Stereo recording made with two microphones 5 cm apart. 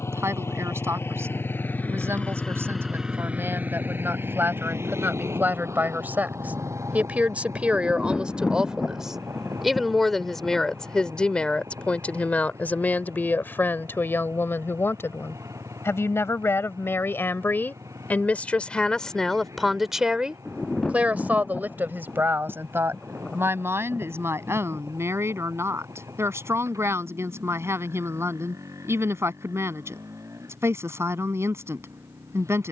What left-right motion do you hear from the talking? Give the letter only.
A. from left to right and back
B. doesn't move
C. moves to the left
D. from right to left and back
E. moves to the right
D.